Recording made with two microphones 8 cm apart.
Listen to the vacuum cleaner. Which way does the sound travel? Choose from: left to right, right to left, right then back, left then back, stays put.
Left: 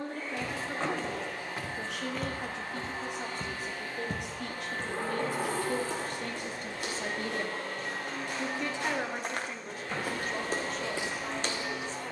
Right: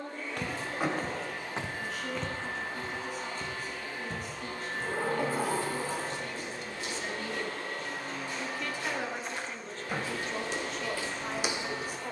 stays put.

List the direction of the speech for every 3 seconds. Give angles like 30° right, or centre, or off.
80° left, 70° left, 40° left, centre.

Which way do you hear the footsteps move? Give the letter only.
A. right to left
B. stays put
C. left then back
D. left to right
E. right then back
C.